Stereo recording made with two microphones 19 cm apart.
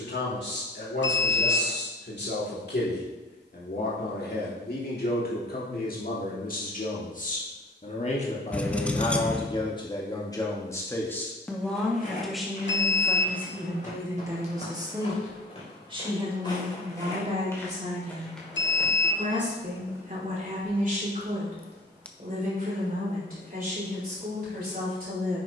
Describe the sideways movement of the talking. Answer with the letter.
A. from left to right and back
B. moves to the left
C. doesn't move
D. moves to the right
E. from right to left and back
D.